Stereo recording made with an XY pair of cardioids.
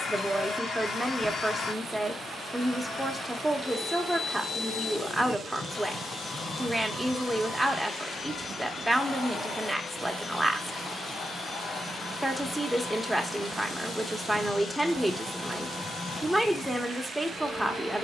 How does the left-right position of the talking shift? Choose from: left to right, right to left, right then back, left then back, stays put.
stays put.